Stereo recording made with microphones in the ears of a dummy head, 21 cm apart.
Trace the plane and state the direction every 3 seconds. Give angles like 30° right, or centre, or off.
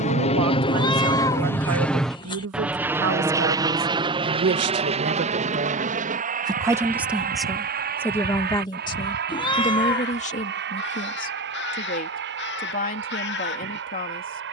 10° left, 20° right, 40° right, 50° right, 50° right.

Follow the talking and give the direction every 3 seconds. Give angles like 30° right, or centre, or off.
80° right, 50° right, centre, 30° left, 40° left.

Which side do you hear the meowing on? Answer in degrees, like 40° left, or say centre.
20° left.